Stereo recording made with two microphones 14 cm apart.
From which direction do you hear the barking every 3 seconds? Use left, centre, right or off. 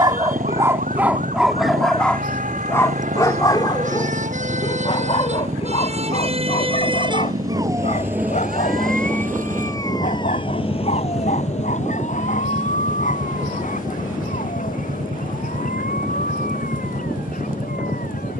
centre, left, left, left, left, left.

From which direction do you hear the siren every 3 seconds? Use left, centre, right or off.
right, right, right, left, left, left.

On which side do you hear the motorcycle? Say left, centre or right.
right.